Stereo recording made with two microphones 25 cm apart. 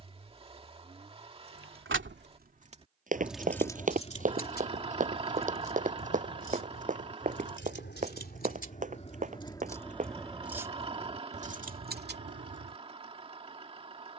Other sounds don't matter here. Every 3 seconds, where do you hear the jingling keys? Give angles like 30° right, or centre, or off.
40° right, 30° left, 40° left, 10° right, 40° right.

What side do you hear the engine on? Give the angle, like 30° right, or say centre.
20° right.